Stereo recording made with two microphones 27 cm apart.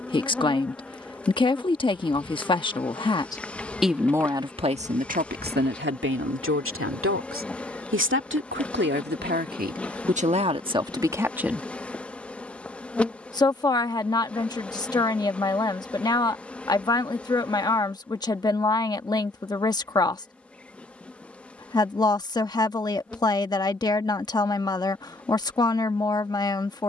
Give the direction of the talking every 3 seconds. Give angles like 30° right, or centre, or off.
20° left, 20° right, 50° right, 20° right, 10° left, 10° left, 10° left, 10° left, 10° left.